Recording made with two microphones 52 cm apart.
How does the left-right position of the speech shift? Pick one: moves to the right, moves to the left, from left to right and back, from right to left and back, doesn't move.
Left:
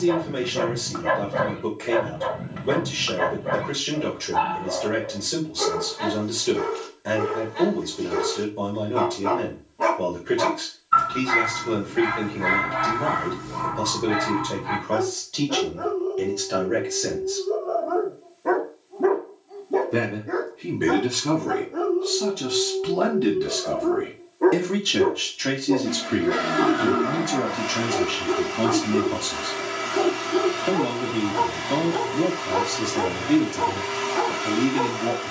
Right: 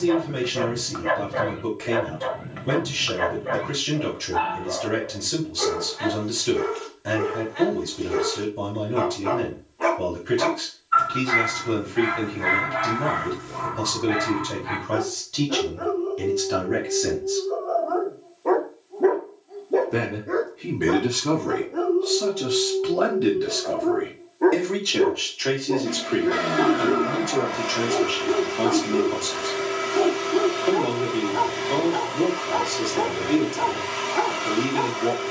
moves to the left.